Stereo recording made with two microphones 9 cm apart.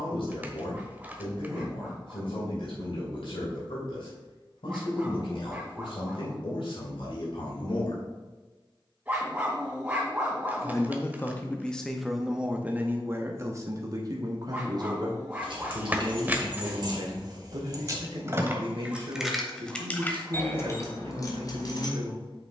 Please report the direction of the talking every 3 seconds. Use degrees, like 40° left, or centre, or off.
80° left, 80° left, 70° left, 20° left, 30° right, 60° right, 70° right, 70° right.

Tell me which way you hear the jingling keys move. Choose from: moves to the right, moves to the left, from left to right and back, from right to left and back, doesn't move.
moves to the left.